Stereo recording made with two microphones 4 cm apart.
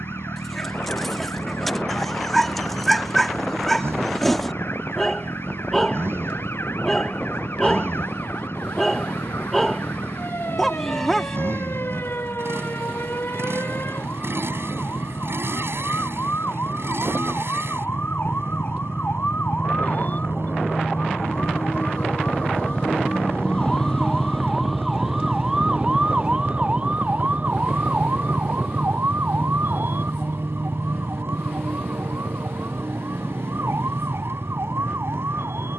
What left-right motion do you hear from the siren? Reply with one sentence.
In this clip you hear the siren travel towards the right.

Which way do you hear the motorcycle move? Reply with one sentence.
In this clip you hear the motorcycle stay put.